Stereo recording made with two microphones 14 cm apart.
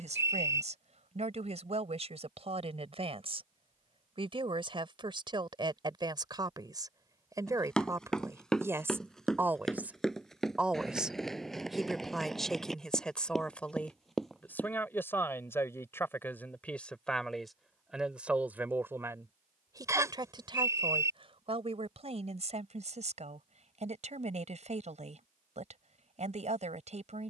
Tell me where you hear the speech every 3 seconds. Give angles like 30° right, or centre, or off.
50° right, 40° right, 20° right, 10° right, 10° left, 10° left, 20° right, 50° right, 50° right.